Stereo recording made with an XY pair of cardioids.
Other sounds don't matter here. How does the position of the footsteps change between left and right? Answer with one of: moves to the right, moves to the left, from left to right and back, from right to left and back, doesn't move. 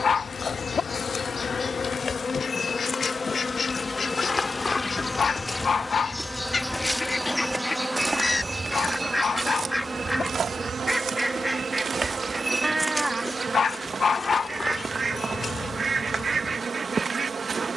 from left to right and back.